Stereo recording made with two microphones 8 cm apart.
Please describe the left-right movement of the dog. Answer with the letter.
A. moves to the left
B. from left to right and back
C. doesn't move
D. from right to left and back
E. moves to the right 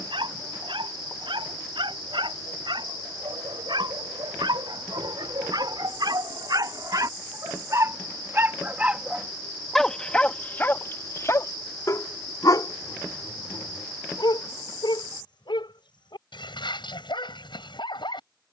A.